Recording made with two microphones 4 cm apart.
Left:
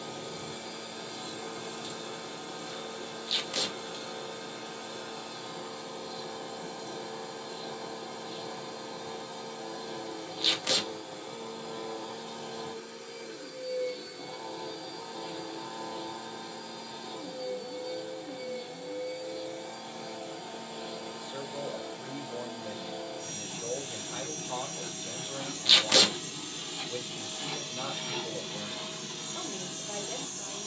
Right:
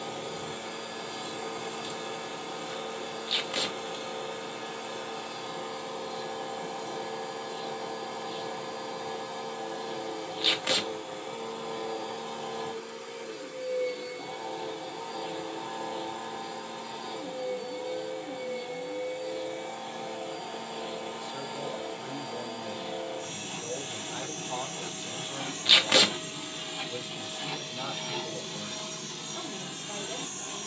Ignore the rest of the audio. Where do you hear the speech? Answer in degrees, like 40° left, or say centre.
50° left.